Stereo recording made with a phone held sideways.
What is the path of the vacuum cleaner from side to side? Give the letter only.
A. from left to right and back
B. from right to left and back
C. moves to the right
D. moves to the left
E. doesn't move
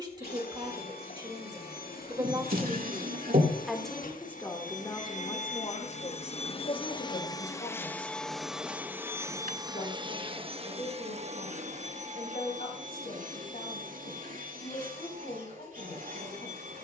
C.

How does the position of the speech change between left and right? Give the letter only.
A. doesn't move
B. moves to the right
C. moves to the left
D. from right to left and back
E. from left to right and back
C.